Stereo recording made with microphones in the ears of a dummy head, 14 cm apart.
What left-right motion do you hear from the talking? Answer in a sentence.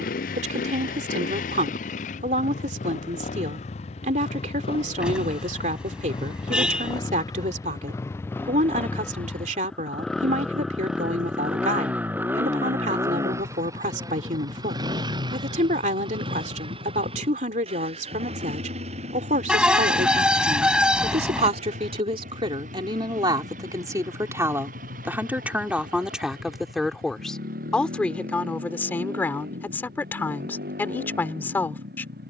You can hear the talking move to the left.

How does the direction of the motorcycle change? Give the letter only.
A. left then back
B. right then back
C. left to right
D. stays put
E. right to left
C.